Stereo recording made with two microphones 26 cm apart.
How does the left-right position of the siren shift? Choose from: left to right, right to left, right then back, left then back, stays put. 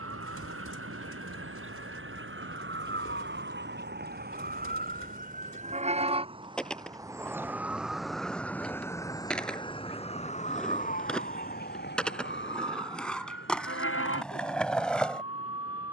right to left.